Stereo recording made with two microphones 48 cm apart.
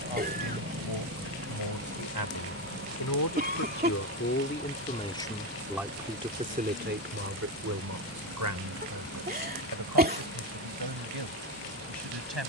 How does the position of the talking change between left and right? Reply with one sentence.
In this clip you hear the talking move from left to right.